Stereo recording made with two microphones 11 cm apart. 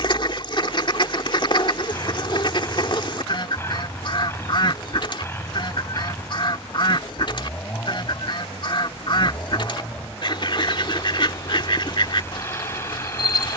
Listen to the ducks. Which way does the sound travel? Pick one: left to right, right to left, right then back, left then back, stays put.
stays put.